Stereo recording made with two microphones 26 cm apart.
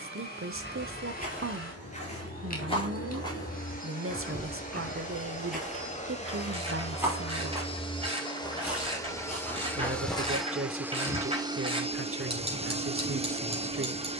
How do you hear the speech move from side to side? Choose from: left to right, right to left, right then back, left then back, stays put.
stays put.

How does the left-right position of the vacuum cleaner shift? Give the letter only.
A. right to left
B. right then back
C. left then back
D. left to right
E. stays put
D.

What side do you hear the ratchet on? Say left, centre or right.
right.